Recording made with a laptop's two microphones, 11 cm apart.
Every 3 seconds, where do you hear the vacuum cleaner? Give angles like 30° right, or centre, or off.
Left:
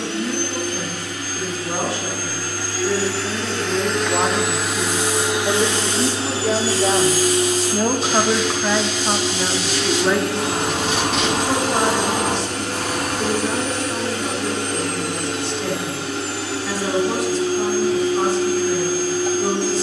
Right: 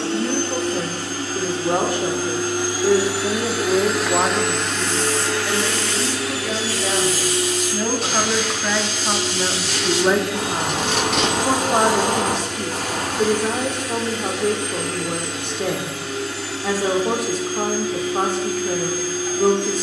30° right, centre, 40° left, 70° left, 70° left, 70° left, 70° left.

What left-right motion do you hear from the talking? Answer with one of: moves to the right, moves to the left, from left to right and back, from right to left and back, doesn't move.
from right to left and back.